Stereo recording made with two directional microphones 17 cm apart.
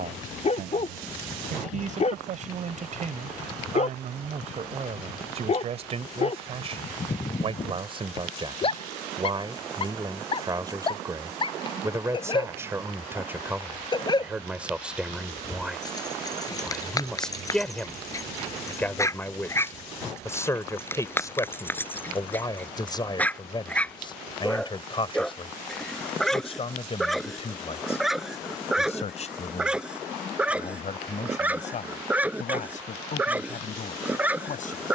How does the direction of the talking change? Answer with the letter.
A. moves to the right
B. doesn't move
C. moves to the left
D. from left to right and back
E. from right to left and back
C.